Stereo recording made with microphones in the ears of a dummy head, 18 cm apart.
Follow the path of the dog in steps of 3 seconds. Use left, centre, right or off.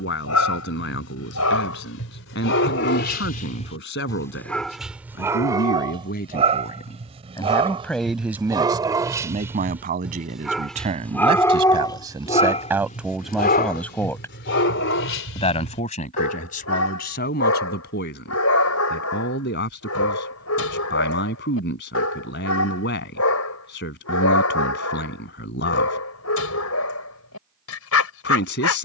left, centre, right, centre, left, left, left, left, left, left.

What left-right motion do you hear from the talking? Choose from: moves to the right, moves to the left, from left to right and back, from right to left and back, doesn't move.
from left to right and back.